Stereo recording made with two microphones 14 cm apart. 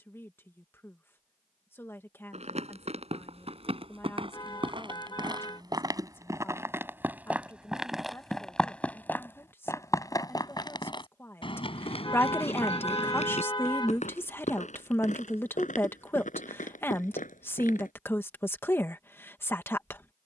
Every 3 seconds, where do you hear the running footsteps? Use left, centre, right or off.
right, right, centre, left, left, left, off.